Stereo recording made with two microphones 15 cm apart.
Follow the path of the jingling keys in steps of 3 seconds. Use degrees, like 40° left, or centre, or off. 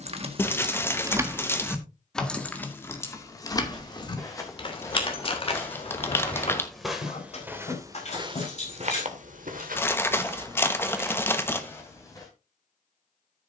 10° right, 30° left, 50° left, off, off.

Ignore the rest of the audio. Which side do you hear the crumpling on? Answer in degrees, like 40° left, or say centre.
20° left.